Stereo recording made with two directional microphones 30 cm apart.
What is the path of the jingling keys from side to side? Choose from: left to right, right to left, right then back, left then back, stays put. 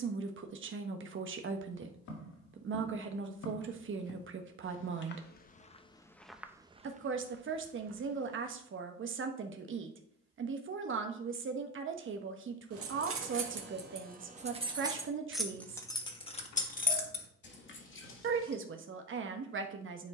right to left.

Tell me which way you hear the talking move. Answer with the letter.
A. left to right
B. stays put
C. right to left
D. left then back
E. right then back
B.